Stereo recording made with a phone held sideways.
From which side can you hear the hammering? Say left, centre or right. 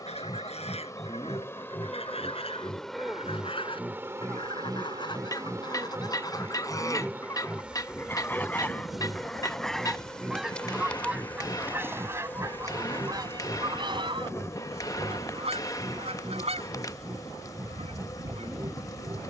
left.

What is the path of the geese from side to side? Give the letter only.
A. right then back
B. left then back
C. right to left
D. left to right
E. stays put
D.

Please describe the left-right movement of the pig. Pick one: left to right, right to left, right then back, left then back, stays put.
left to right.